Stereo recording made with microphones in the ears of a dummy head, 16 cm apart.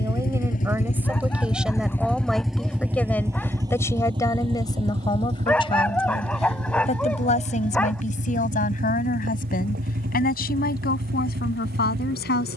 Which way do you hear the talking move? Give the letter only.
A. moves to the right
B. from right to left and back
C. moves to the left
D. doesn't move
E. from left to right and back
C.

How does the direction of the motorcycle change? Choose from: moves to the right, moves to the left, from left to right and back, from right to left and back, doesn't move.
moves to the right.